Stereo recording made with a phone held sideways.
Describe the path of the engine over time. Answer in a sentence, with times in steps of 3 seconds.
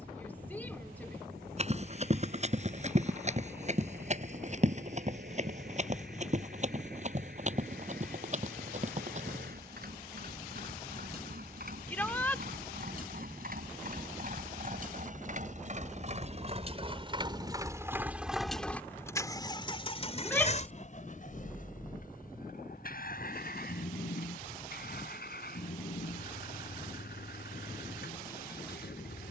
In this clip you hear the engine on the right from 0 s and on the left from 18 s.